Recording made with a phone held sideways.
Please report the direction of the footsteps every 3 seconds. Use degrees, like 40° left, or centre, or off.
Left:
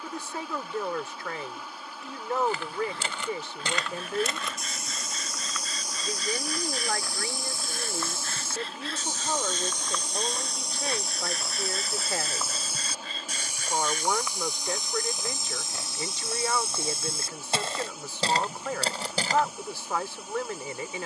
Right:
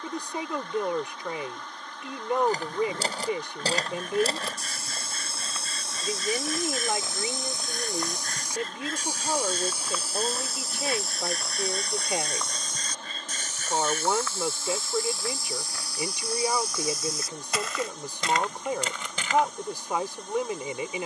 40° right, 30° right, 20° right, 10° right, 10° left, 20° left, 30° left.